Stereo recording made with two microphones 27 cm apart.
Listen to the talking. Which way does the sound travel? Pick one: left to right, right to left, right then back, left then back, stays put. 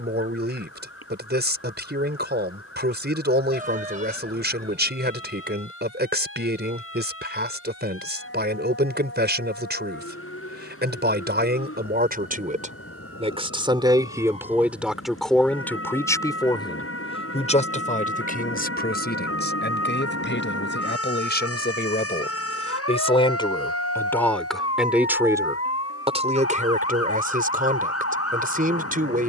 left then back.